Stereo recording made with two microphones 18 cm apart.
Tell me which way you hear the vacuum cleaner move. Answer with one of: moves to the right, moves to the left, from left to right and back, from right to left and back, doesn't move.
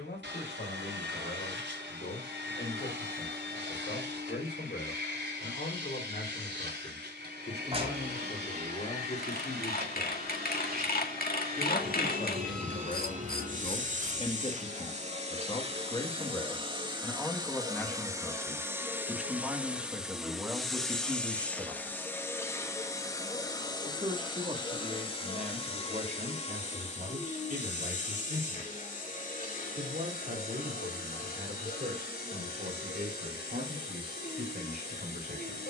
moves to the left.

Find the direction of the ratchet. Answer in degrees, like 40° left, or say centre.
50° left.